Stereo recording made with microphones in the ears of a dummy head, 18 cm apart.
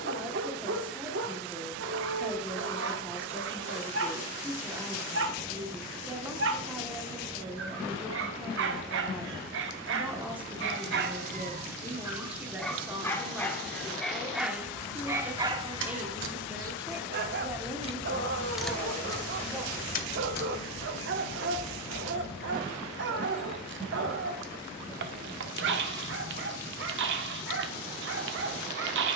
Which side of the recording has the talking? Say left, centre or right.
centre.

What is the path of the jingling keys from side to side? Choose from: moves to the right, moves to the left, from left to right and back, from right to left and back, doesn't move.
moves to the left.